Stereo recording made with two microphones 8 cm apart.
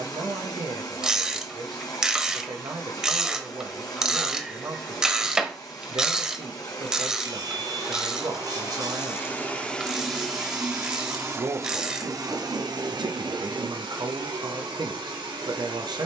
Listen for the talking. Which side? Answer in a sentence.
You can hear the talking on the right.